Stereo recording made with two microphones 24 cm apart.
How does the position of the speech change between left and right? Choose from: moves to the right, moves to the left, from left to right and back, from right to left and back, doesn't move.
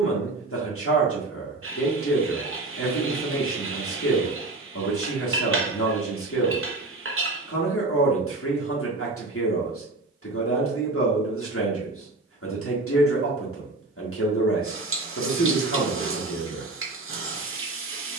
doesn't move.